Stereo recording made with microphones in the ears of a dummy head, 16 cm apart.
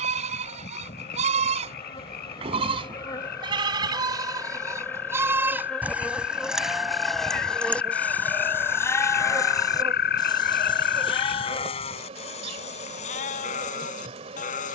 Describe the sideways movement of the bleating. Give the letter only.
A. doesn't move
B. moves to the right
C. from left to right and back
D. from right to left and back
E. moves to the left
E.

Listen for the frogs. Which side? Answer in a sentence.
You can hear the frogs on the left.